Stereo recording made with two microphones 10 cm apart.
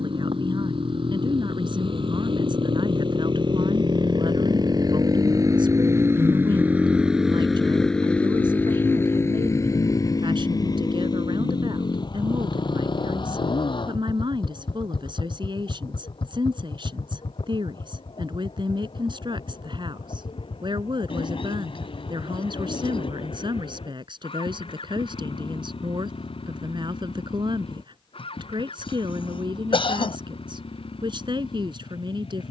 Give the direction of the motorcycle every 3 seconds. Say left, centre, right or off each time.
right, right, centre, left, left, left, left, left, left, left, left.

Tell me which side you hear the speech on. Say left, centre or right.
right.